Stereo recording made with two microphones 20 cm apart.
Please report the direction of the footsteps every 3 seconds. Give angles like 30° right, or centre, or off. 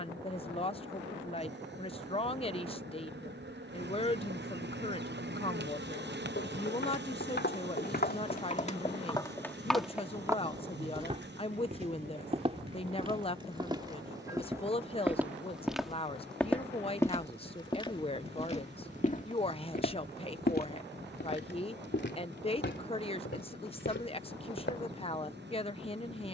off, off, 60° left, 10° right, 20° right, 10° left, 40° left, 70° left, 70° left.